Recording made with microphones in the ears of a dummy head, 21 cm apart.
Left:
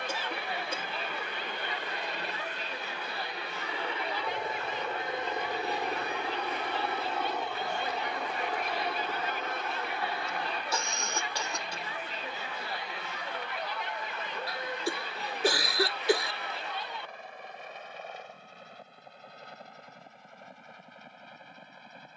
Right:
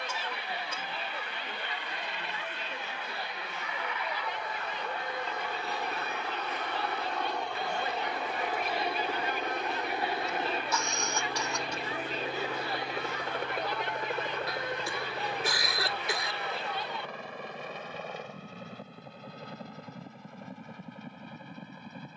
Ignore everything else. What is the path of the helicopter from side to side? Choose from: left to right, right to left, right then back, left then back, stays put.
left to right.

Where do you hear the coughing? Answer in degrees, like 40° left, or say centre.
30° left.